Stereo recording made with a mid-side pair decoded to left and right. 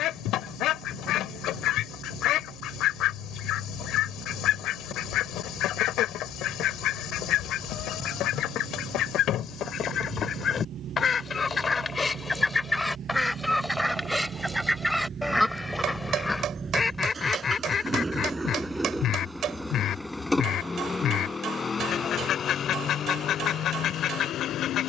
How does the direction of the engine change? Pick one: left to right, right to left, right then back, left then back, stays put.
right to left.